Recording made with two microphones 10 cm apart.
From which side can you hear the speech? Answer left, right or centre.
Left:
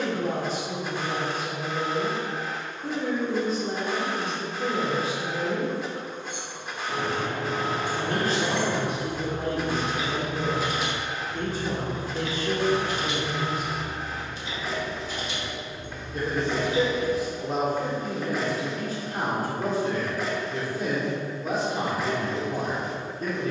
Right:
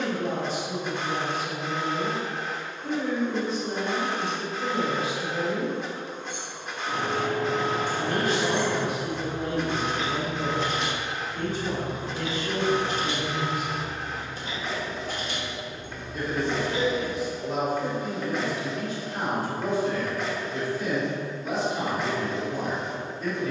left.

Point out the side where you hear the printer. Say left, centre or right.
centre.